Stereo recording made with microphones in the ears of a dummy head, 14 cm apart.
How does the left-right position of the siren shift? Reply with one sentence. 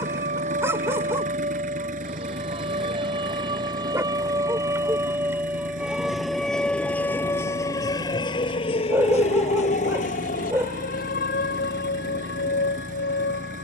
You can hear the siren go from the right side to the left.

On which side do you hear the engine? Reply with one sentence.
You can hear the engine on the right.